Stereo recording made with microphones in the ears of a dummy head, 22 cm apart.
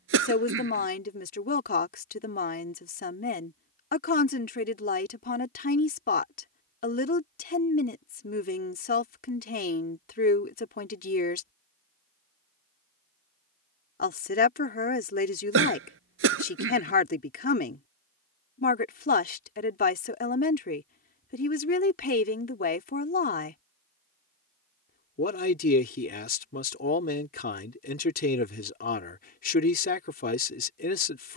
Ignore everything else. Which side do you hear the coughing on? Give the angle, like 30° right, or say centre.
60° right.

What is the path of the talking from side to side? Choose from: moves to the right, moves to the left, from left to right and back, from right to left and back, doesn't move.
doesn't move.